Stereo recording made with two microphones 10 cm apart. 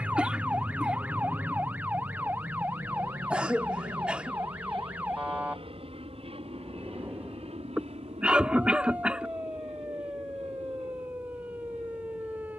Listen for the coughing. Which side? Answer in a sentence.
In this clip you hear the coughing in the centre.